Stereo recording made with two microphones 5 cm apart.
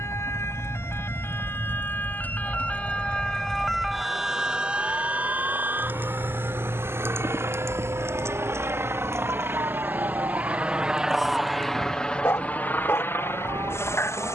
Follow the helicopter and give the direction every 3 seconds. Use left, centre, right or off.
right, right, right, right, left.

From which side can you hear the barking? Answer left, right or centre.
left.